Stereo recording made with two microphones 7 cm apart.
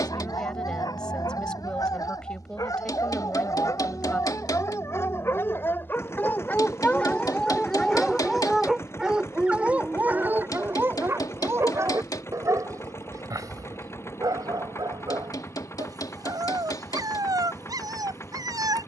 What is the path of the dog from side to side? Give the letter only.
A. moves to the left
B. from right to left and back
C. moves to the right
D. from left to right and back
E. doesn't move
C.